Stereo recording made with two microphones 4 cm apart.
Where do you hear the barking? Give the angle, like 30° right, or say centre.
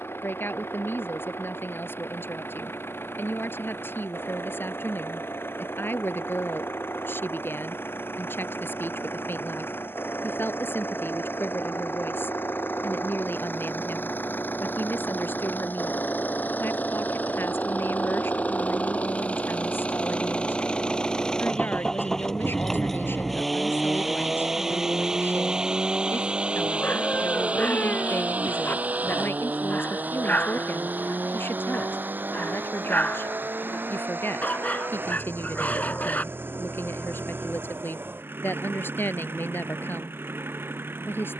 40° left.